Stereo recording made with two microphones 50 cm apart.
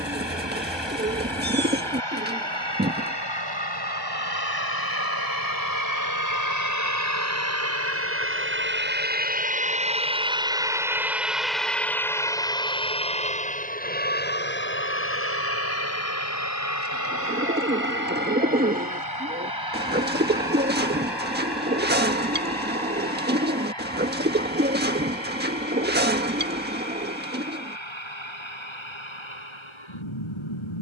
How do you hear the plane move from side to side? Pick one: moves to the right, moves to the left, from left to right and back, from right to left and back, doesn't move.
moves to the left.